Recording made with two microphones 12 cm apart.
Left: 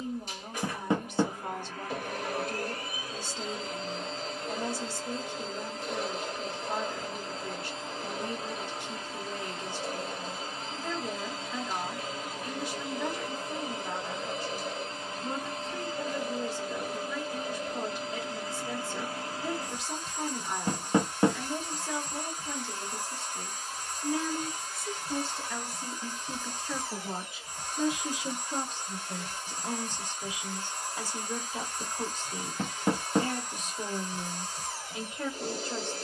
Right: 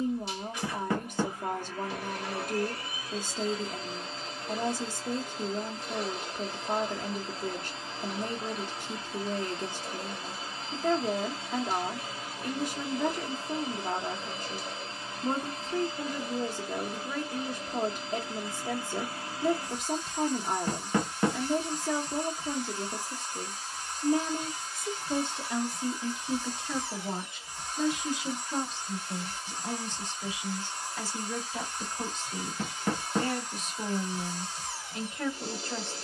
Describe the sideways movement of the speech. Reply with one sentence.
You can hear the speech move from right to left.